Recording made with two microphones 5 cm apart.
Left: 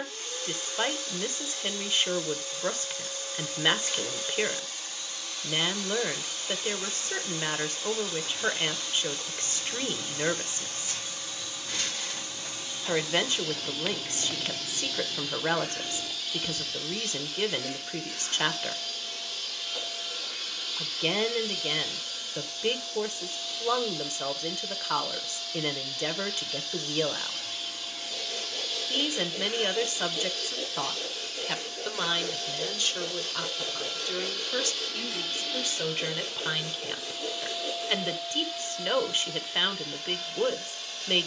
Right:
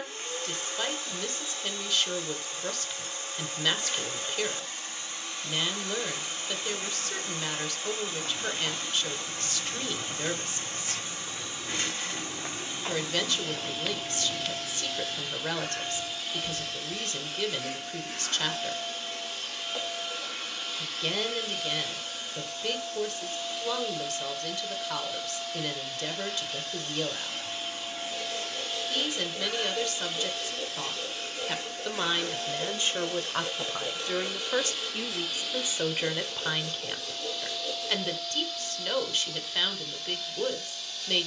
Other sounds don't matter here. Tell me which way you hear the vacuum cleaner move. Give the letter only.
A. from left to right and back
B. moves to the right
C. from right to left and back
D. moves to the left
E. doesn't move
D.